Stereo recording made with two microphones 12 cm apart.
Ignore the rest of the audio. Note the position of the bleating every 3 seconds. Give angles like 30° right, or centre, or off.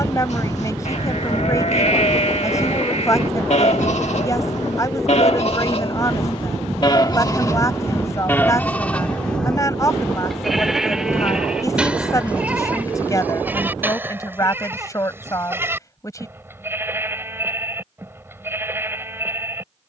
60° left, 60° left, 30° left, centre, 10° right, 20° right, 20° right.